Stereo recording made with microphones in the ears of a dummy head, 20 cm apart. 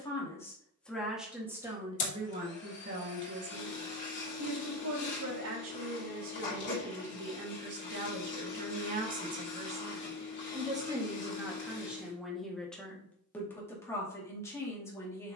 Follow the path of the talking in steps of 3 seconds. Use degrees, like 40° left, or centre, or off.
10° right, 70° right, 60° right, 20° right, 10° left.